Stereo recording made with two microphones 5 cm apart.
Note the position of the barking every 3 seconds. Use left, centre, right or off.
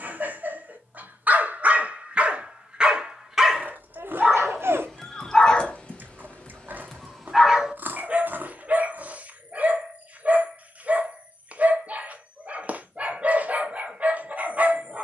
right, centre, centre, right, right.